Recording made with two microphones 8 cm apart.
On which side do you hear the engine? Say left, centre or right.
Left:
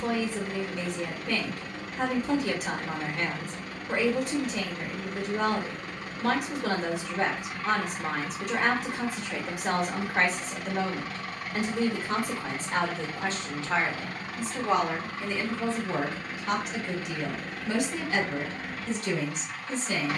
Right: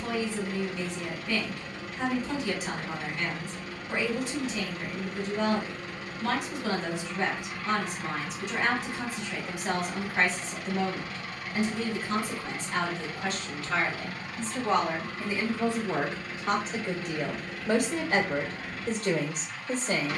left.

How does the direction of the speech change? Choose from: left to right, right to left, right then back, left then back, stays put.
left to right.